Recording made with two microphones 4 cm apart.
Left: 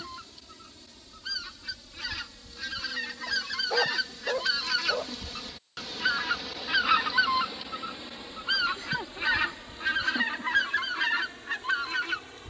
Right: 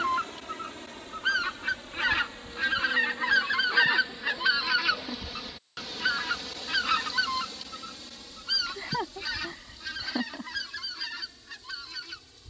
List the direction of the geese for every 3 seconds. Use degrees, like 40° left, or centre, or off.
50° right, 20° right, 20° left, 40° left.